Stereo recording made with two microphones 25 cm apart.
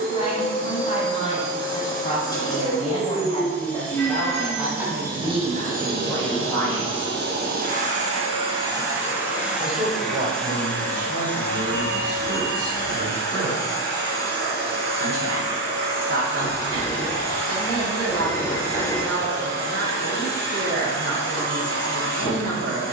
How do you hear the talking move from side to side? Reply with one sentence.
You can hear the talking move to the right.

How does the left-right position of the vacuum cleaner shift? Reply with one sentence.
In this clip you hear the vacuum cleaner move from left to right and back again.